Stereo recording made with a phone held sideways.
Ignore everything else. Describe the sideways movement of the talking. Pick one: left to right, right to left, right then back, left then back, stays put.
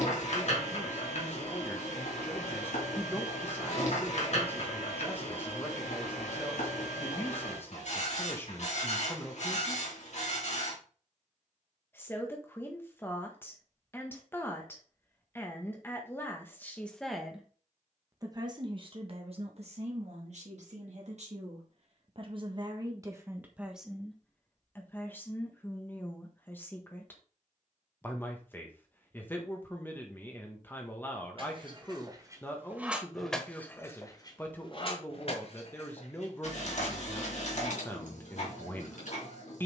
right then back.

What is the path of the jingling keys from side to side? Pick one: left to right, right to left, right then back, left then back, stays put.
right to left.